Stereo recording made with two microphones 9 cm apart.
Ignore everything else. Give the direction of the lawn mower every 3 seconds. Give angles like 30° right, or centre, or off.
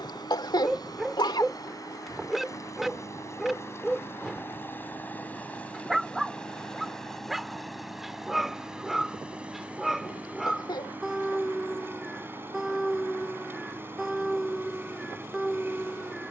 40° left, 20° left, centre, 20° right, 30° right, 30° right.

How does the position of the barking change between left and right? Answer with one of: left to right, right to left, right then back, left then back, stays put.
stays put.